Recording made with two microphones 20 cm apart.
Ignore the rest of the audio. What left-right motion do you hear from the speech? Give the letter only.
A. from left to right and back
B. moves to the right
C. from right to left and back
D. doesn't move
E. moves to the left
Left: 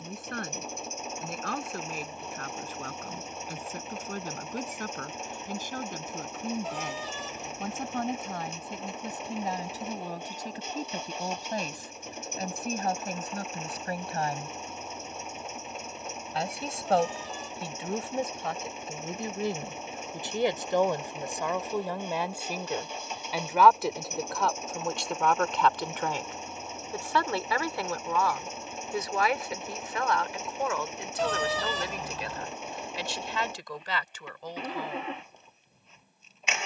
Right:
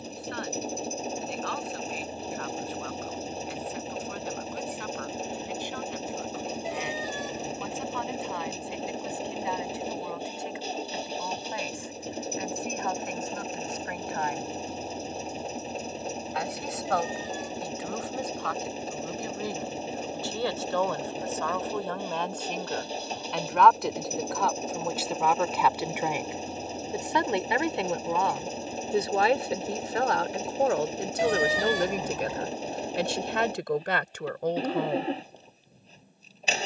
B.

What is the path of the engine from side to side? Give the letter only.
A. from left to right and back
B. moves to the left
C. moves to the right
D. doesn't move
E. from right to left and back
D.